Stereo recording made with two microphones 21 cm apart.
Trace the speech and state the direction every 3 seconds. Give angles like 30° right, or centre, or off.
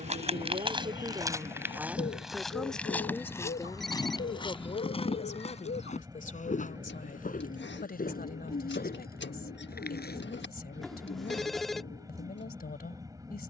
20° right, 20° left, 40° left, 50° left, 50° left.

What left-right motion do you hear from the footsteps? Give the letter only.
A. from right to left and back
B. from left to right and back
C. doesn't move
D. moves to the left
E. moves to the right
D.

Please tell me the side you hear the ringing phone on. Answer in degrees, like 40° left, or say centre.
centre.